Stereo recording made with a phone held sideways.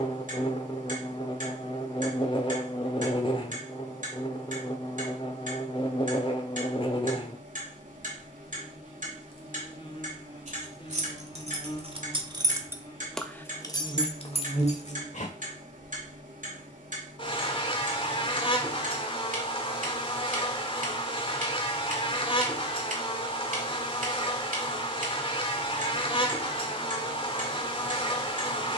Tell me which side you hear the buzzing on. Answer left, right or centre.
left.